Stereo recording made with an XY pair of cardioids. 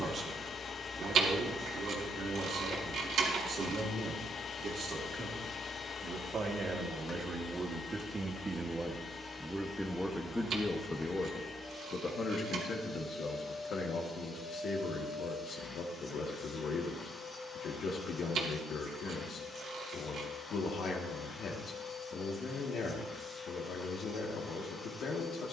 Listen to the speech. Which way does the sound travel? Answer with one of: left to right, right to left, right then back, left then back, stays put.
right to left.